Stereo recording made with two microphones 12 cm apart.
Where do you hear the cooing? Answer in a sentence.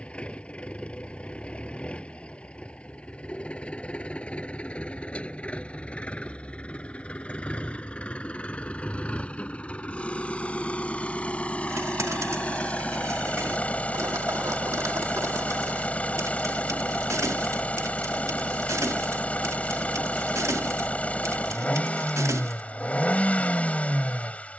You can hear the cooing on the right.